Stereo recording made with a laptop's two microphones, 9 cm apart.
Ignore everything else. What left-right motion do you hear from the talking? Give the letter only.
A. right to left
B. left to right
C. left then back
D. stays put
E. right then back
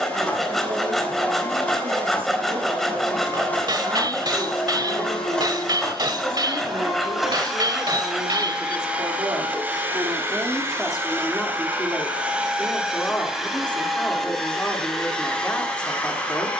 A.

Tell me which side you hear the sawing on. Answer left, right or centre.
centre.